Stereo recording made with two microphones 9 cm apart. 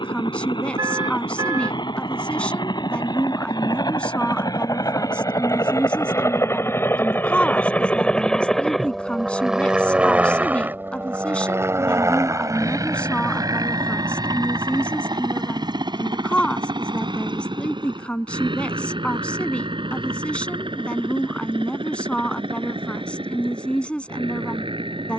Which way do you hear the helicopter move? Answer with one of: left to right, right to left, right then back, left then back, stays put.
left to right.